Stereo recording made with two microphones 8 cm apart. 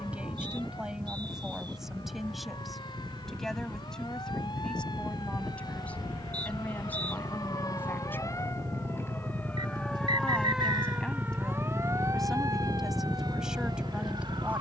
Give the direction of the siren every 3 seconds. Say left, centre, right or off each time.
left, left, left, centre, right.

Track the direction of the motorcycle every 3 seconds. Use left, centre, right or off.
right, right, right, right, left.